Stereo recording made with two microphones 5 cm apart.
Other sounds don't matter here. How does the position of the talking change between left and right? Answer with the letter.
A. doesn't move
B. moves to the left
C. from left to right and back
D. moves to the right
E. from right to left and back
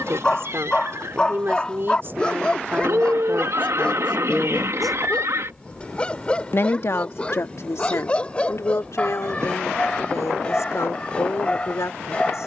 B.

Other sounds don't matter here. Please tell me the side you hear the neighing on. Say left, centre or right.
right.